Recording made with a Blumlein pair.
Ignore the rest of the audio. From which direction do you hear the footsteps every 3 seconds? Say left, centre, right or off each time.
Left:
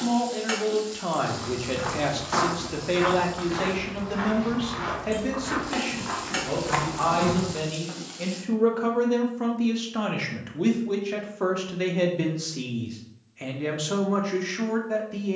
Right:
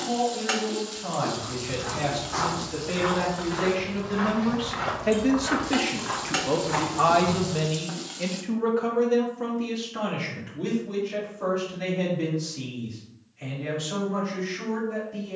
left, centre, left, off, off.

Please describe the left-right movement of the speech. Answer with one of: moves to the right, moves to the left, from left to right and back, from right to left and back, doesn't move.
from left to right and back.